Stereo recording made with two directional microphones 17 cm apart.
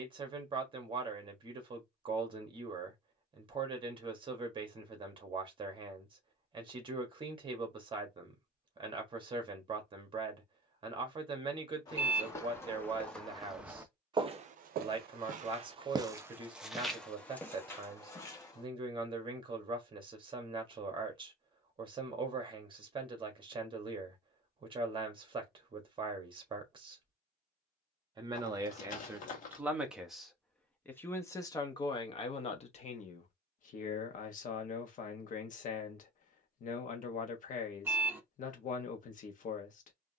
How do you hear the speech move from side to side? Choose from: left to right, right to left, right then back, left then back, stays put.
right to left.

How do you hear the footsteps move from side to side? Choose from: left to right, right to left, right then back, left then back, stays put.
right then back.